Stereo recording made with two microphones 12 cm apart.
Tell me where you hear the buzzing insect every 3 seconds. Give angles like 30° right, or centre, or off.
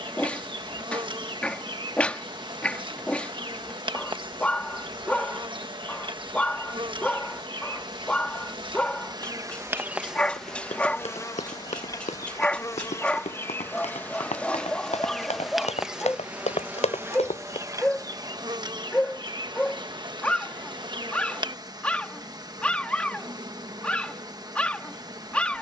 40° right, 40° right, 40° right, centre, 20° left, 10° right, 40° right, 40° right, 40° right.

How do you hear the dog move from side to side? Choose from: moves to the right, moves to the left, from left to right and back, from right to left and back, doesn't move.
doesn't move.